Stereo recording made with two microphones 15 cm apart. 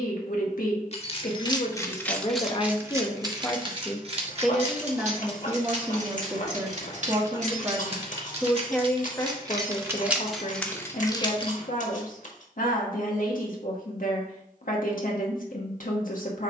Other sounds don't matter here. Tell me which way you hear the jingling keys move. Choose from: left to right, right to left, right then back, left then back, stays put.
right then back.